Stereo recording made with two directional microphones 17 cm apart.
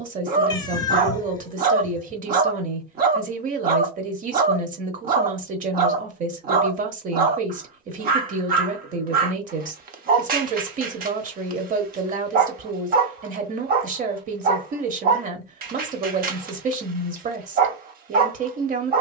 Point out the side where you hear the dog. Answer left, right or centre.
right.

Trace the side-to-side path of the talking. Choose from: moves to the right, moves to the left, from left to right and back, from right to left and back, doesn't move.
doesn't move.